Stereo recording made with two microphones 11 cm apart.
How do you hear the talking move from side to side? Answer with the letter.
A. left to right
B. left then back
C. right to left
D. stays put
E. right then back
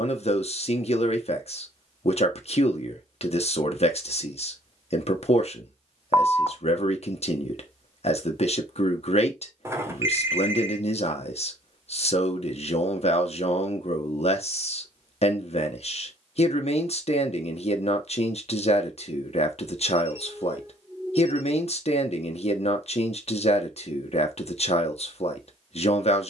D.